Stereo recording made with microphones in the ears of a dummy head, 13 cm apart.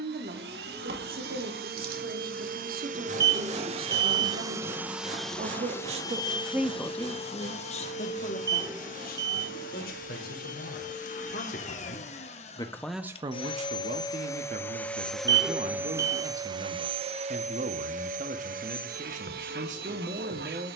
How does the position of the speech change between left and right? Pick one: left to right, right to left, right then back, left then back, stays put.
left then back.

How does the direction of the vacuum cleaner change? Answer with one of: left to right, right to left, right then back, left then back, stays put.
left then back.